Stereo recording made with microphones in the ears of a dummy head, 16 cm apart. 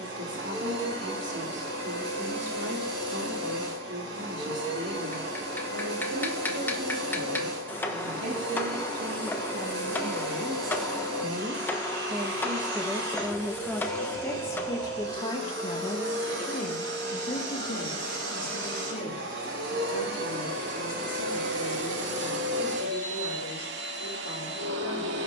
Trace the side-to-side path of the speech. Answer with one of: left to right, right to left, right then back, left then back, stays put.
right to left.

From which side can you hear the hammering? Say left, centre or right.
centre.